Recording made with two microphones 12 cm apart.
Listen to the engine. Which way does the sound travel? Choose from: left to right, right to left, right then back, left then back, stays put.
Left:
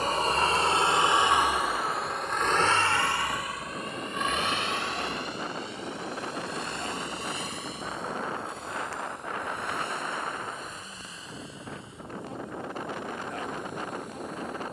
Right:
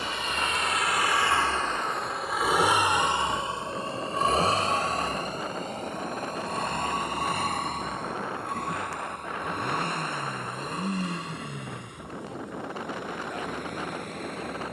left to right.